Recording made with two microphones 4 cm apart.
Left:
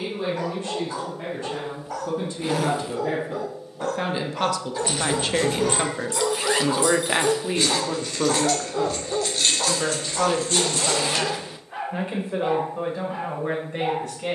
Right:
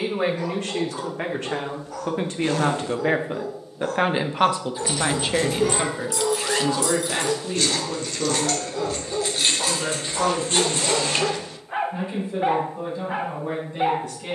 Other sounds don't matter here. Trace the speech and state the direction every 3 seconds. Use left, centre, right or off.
right, right, left, left, left.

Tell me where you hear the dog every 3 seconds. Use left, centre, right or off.
left, left, left, centre, right.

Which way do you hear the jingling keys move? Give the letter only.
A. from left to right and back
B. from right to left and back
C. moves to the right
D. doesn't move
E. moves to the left
C.